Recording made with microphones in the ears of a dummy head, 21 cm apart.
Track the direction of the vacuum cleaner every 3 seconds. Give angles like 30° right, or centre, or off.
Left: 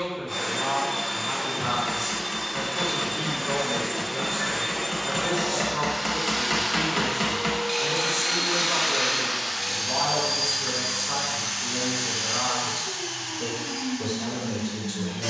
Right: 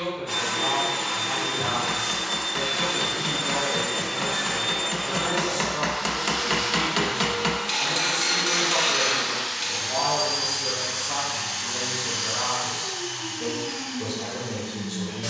50° right, 10° right, 50° left, 70° left, 80° left.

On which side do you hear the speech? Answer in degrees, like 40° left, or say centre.
50° left.